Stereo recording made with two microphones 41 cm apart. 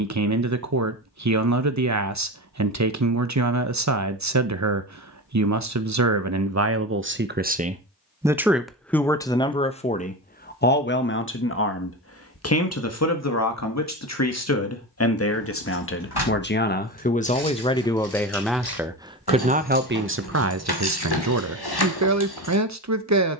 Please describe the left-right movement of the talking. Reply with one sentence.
In this clip you hear the talking move from right to left and back again.